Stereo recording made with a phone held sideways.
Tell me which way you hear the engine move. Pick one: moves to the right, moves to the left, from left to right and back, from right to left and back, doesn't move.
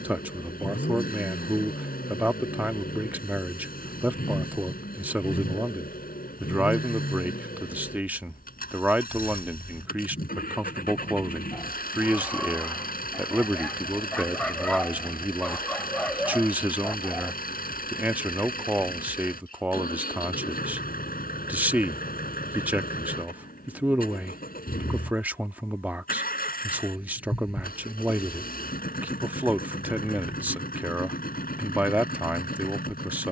doesn't move.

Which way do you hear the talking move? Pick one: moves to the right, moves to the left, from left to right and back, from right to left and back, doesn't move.
doesn't move.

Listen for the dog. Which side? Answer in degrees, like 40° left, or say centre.
10° left.